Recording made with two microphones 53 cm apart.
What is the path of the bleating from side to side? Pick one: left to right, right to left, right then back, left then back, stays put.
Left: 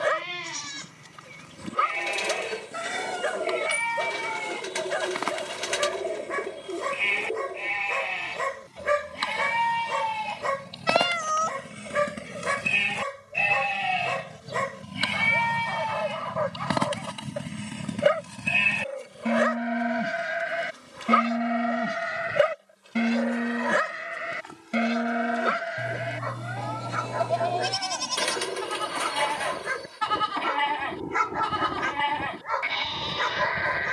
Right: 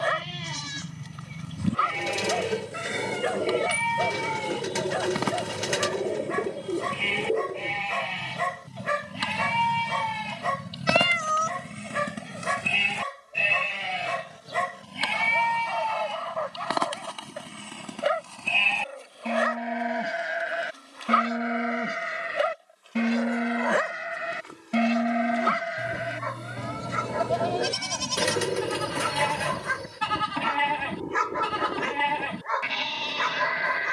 left then back.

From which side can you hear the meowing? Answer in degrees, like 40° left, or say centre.
10° left.